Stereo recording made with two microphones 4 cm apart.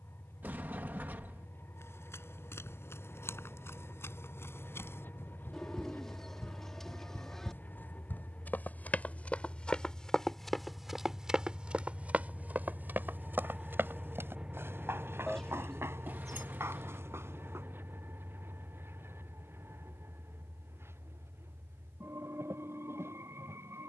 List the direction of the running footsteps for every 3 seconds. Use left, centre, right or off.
left, left, left, centre, right, right, off, off.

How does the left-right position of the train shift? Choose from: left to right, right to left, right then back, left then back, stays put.
left to right.